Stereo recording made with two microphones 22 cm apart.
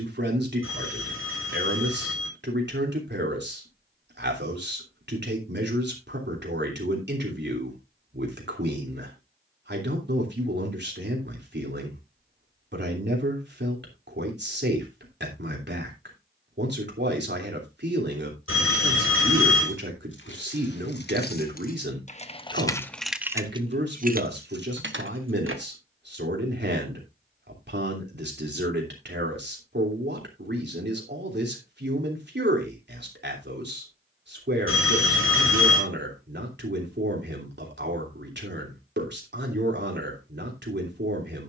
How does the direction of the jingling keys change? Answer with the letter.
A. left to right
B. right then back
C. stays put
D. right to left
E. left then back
A.